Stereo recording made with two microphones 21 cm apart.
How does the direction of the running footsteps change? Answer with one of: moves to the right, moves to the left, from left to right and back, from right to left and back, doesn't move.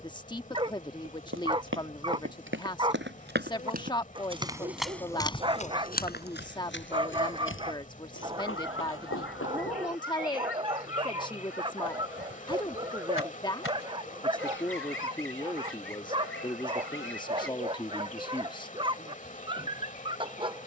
moves to the left.